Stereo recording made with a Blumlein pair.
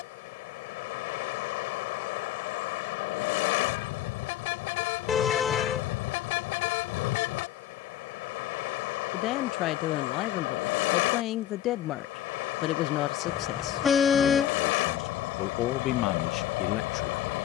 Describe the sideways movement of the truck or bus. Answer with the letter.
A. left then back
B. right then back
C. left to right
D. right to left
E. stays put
E.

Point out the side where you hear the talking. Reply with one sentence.
In this clip you hear the talking on the left.